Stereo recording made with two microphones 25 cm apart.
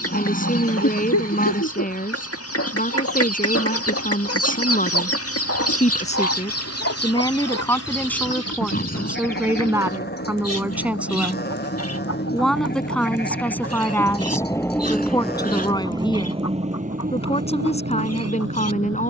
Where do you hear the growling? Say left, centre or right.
left.